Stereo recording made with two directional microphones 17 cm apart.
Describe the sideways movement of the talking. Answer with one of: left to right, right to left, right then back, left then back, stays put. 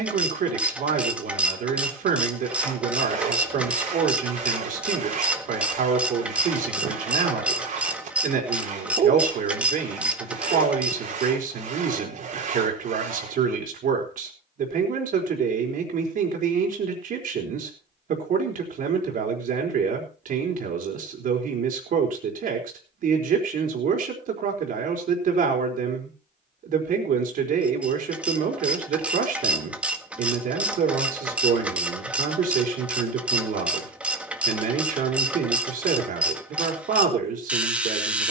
stays put.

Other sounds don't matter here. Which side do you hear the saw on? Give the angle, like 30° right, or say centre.
50° right.